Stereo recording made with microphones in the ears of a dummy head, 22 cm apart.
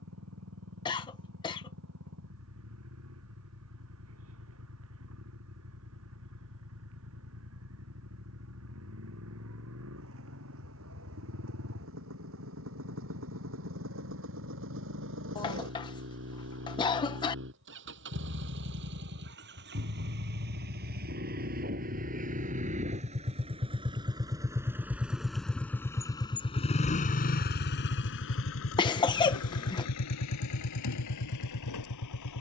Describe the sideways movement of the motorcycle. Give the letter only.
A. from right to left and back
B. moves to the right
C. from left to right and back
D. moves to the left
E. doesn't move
D.